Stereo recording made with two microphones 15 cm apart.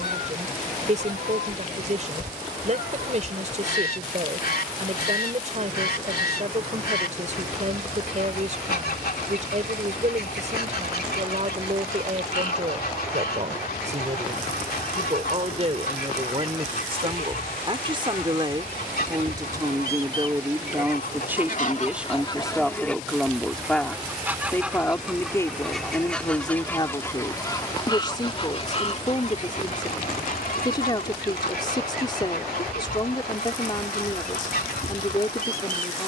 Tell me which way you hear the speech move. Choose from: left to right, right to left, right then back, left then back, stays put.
right to left.